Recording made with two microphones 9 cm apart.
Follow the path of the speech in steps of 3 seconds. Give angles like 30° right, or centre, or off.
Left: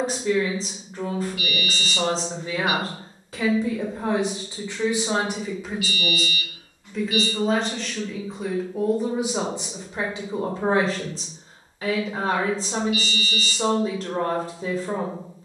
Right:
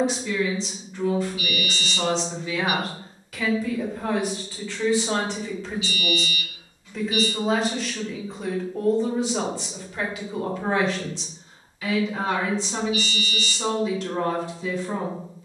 40° left, 20° left, centre, 30° left, 40° left.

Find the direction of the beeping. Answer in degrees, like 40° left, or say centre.
70° left.